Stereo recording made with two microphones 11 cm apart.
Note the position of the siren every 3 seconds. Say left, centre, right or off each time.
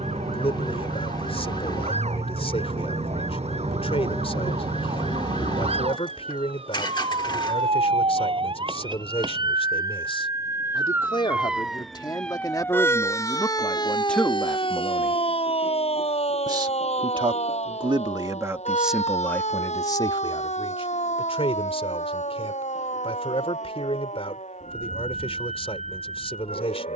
right, right, right, right, left, left, left, left, left.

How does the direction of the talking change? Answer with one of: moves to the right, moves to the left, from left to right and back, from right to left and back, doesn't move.
from left to right and back.